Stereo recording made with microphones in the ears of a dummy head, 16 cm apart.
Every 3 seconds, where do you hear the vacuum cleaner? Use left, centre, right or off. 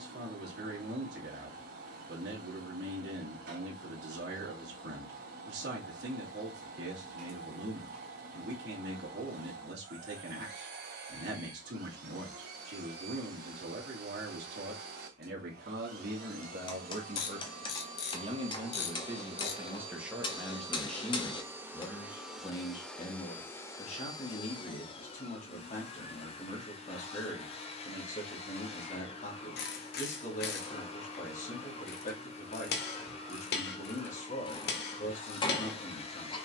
right, right, right, right, right, right, right, centre, left, left, left, left.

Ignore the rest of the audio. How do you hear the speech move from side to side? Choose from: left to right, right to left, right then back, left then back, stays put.
right to left.